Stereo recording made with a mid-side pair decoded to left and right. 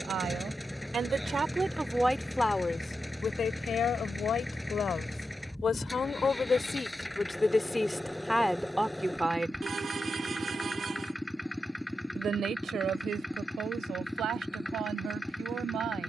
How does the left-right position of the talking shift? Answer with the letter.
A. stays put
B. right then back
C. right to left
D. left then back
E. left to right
D.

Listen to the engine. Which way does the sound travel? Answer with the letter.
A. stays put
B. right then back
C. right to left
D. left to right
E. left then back
A.